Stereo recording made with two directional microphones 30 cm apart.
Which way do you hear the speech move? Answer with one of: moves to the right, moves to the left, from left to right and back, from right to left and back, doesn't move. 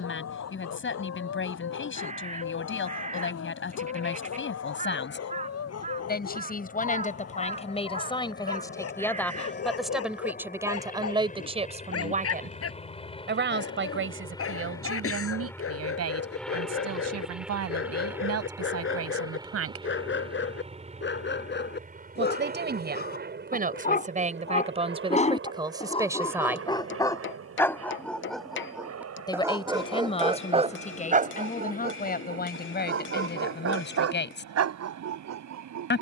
from left to right and back.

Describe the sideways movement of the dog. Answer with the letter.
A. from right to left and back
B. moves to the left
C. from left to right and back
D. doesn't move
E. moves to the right
E.